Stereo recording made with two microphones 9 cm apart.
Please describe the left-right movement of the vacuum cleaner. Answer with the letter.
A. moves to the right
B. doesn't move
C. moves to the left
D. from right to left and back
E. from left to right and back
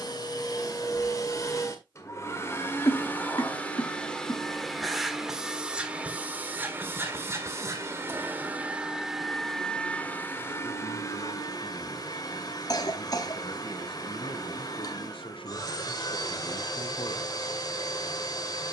E.